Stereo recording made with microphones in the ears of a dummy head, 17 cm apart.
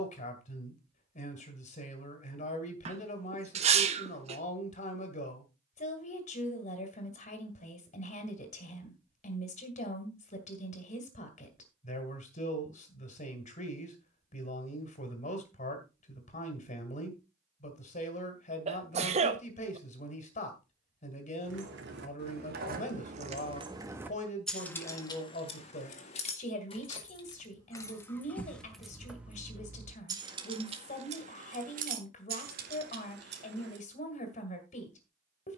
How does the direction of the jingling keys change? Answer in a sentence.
In this clip you hear the jingling keys move from right to left and back again.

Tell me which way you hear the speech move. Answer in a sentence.
In this clip you hear the speech stay put.